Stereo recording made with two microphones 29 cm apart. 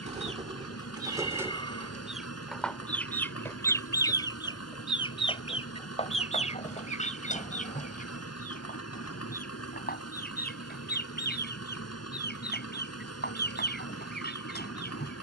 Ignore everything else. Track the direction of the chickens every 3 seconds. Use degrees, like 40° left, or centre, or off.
10° right, 10° left, 20° left, 30° left, 30° left.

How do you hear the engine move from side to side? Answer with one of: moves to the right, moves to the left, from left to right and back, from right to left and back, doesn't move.
doesn't move.